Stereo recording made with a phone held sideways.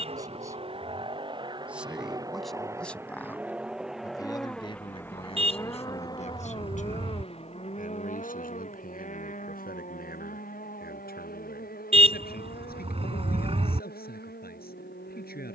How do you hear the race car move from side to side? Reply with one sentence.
In this clip you hear the race car go from the right side to the left.